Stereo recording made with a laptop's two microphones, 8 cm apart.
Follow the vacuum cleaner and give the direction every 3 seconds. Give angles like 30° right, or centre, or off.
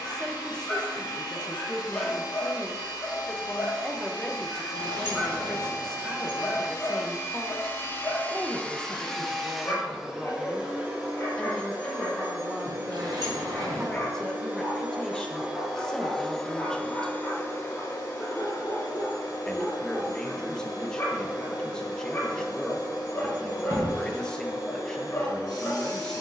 80° left, 70° left, 40° left, 10° right, 30° right, 10° left, 70° left, 70° left, 70° left.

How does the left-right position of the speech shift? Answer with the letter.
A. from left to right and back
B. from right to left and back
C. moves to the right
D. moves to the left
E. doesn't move
E.